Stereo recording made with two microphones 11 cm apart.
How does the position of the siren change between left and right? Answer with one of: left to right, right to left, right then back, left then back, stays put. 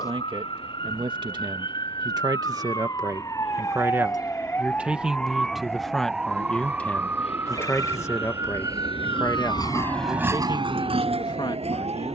left to right.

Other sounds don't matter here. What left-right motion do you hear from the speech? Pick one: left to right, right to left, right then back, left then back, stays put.
right to left.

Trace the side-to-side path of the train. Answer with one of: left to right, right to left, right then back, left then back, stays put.
left to right.